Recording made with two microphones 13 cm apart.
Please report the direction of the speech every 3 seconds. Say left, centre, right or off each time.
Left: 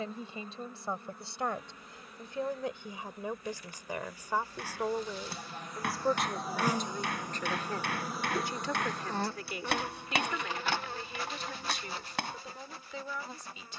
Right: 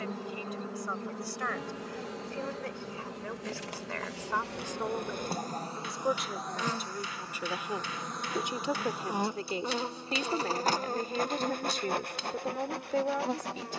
left, centre, centre, right, right.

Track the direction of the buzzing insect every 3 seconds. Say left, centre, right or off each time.
right, right, centre, right, right.